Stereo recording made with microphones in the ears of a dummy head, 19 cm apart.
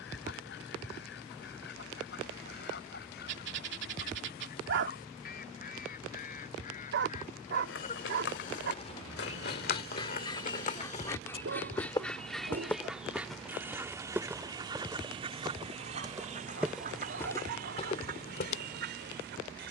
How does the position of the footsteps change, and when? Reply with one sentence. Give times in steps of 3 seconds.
In this clip you hear the footsteps not at all from 0 s, on the left from 6 s, in the centre from 12 s and on the left from 18 s.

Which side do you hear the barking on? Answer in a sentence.
In this clip you hear the barking on the right.